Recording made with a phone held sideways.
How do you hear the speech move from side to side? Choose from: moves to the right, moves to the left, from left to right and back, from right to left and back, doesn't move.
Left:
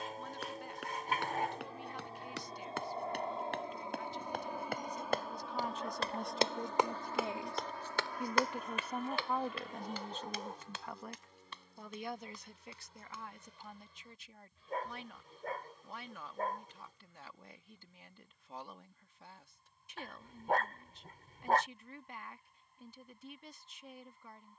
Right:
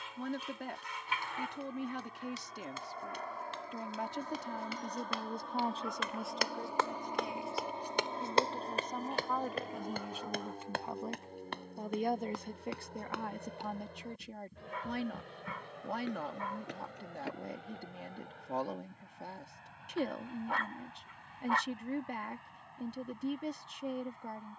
from right to left and back.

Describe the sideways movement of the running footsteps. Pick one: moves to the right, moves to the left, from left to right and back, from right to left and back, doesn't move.
moves to the right.